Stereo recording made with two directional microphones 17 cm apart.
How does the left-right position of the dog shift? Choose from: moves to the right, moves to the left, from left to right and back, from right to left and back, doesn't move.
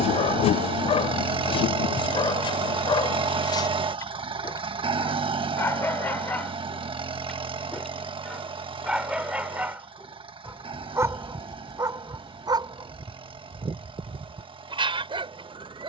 moves to the right.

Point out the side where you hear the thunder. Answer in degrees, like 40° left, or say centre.
60° left.